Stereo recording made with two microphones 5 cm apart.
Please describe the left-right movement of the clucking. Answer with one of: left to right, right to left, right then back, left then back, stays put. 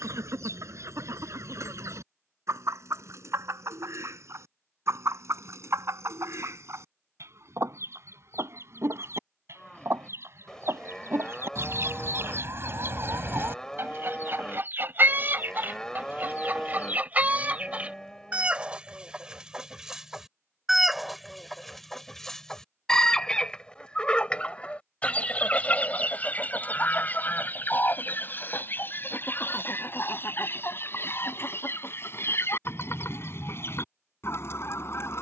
right to left.